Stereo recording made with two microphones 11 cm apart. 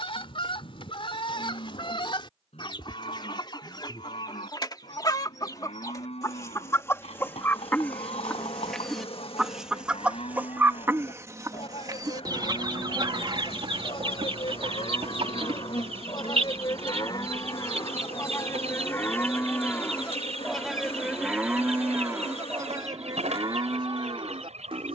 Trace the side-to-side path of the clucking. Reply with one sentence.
In this clip you hear the clucking travel towards the right.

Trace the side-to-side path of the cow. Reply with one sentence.
In this clip you hear the cow travel towards the right.